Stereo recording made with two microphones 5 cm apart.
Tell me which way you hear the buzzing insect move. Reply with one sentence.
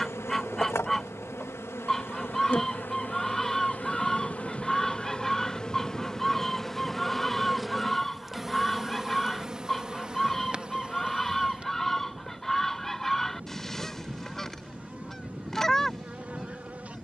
In this clip you hear the buzzing insect move to the right.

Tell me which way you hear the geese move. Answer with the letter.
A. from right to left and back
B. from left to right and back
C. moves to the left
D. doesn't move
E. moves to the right
D.